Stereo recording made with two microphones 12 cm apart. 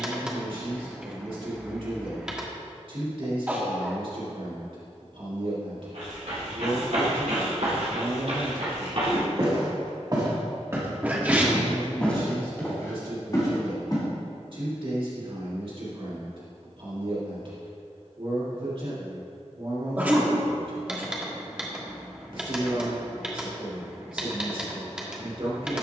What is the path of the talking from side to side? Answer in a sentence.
You can hear the talking stay put.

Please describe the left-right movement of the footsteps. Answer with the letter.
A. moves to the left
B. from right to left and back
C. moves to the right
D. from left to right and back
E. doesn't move
A.